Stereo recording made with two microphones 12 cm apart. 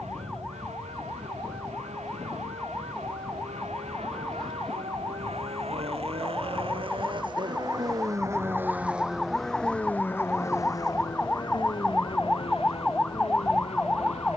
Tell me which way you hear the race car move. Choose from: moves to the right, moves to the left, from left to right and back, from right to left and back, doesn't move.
moves to the left.